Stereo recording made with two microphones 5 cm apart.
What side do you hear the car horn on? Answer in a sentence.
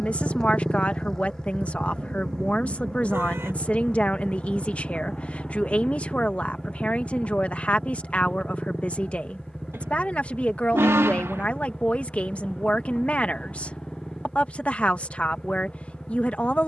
In this clip you hear the car horn on the right.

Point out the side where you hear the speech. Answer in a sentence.
You can hear the speech on the left.